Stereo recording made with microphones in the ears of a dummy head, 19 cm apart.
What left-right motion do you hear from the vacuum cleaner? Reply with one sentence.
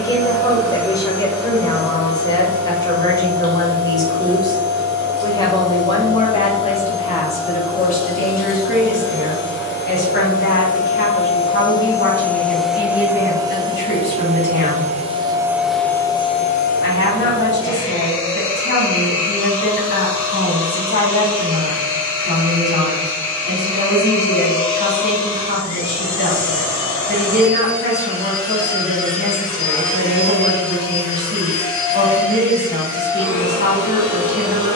In this clip you hear the vacuum cleaner go right and come back.